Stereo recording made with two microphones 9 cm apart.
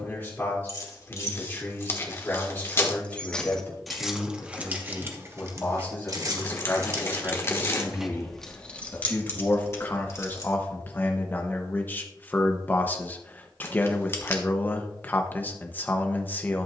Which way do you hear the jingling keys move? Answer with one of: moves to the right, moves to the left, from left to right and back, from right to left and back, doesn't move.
from left to right and back.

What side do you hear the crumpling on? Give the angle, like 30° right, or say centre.
30° left.